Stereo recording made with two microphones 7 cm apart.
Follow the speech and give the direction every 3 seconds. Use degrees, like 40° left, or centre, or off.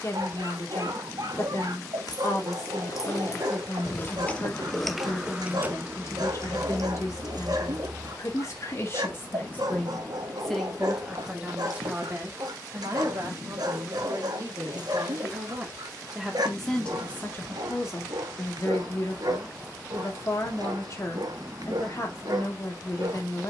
40° left, 40° left, 40° left, centre, 40° right, 10° left, 40° left, 40° left.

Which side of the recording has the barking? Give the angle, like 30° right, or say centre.
60° right.